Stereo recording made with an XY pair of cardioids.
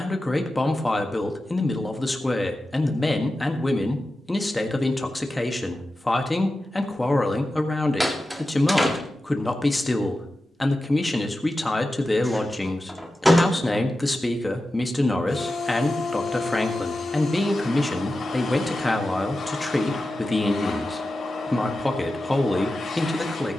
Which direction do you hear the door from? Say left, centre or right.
centre.